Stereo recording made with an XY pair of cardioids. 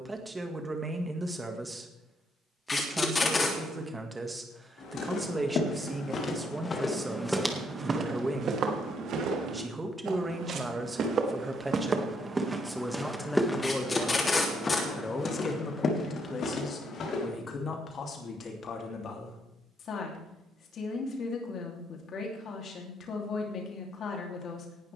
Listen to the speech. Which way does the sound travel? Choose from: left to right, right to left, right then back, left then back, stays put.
right to left.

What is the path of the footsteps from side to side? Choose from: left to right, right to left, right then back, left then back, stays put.
right then back.